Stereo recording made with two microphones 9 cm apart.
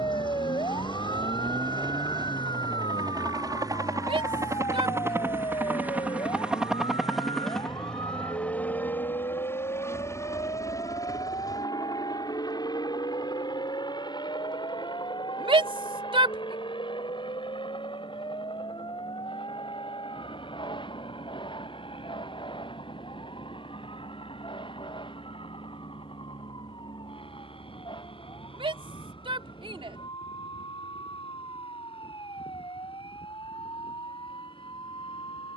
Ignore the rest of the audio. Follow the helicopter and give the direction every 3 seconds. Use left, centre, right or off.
right, right, centre, left, left, left, left, left, left, left, left, left.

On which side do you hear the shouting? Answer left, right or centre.
right.